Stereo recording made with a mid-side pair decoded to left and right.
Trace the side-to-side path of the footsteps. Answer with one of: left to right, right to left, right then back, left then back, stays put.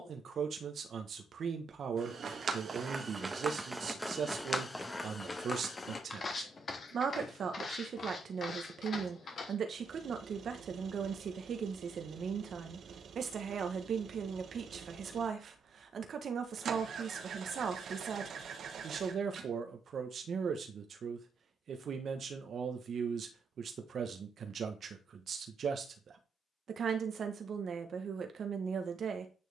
right to left.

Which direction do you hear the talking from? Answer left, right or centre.
right.